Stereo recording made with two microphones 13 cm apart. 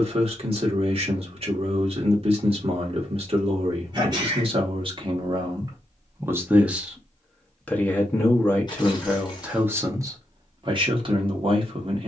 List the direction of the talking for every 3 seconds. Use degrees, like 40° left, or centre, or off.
50° right, 40° right, centre, 30° right.